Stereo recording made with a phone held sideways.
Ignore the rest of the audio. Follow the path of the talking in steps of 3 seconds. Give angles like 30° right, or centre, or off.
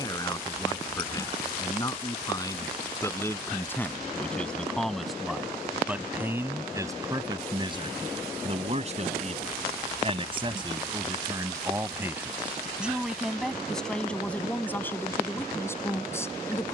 20° left, 10° left, 30° right, 30° right, centre, 10° left.